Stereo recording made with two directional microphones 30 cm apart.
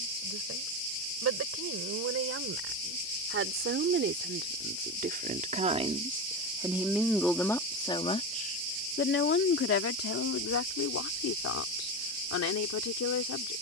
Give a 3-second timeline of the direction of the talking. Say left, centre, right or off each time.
right, right, centre, left, left.